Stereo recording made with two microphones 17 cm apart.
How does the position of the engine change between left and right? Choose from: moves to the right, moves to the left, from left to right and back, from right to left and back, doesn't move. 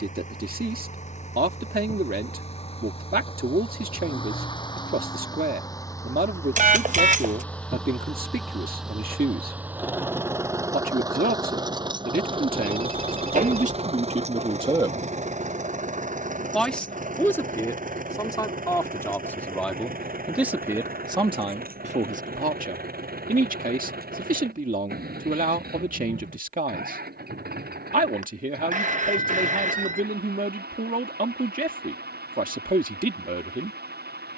moves to the right.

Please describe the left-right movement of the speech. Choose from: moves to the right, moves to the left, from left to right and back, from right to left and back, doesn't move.
from right to left and back.